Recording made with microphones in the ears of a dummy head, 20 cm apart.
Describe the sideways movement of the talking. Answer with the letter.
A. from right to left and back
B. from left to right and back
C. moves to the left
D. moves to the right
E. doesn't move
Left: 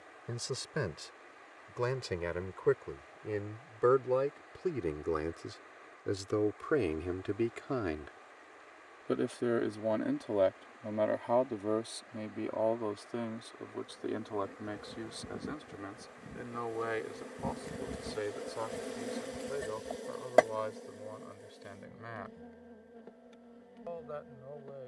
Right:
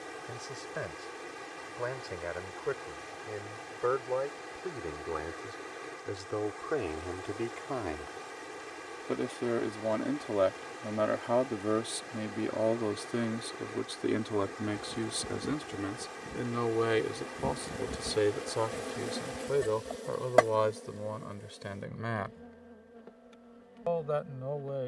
D.